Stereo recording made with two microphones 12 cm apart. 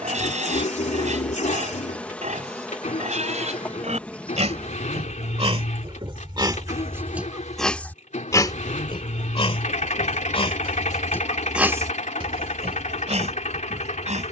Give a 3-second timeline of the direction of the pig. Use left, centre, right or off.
right, right, centre, left, right.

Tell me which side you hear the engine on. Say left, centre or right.
left.